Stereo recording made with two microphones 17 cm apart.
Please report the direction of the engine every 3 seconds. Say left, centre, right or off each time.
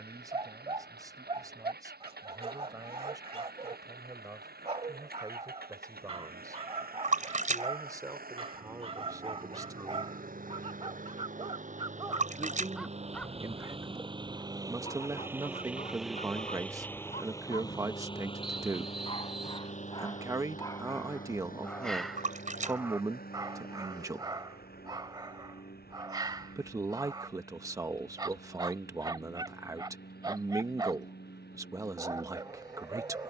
right, right, right, right, right, centre, left, left, left, left, left.